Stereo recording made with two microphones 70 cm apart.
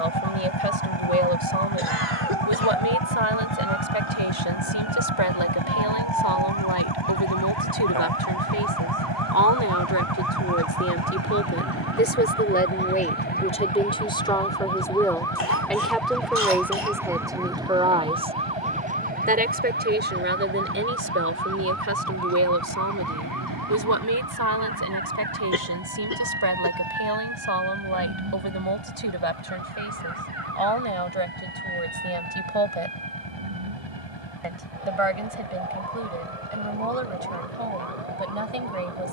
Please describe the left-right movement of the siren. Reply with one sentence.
In this clip you hear the siren move to the right.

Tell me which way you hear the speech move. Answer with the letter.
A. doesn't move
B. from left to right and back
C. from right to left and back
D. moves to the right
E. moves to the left
D.